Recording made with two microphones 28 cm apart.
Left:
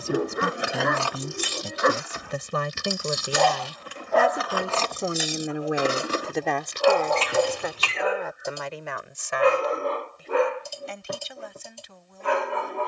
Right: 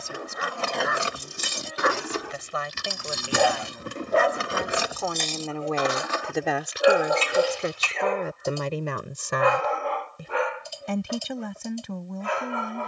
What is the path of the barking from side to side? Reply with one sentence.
You can hear the barking go right and come back.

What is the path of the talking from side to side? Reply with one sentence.
You can hear the talking travel towards the right.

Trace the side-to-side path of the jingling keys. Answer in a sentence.
You can hear the jingling keys move from left to right and back again.